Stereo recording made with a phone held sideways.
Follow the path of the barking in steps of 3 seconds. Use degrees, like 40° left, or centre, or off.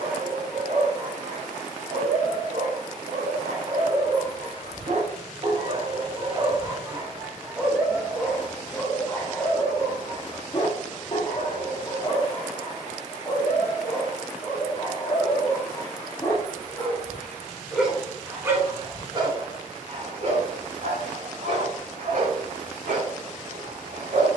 80° right, 60° right, 10° right, 30° left, 40° left, 20° left, 40° right, 70° right.